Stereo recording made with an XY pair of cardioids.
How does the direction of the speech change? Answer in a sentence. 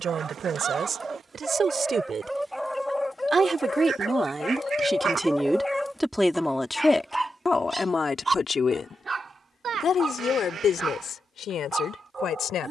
You can hear the speech travel towards the left.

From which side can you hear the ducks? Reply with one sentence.
You can hear the ducks on the right.